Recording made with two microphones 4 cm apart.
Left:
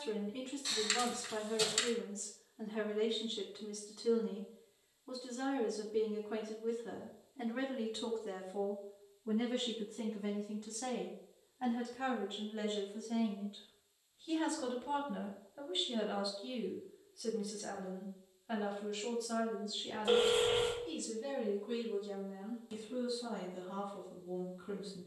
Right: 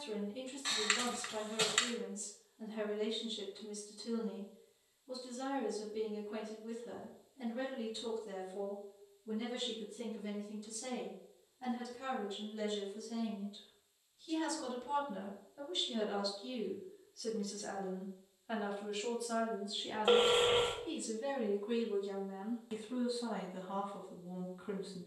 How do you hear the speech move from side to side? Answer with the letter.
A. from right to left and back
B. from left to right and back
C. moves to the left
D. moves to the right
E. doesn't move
D.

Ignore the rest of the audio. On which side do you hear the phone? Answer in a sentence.
In this clip you hear the phone on the right.